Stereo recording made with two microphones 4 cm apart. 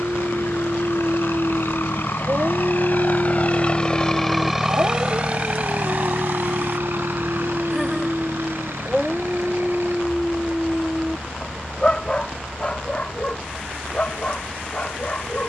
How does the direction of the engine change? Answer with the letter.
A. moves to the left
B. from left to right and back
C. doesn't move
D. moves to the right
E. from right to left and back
D.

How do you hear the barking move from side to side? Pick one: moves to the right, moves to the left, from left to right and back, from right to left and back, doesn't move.
moves to the left.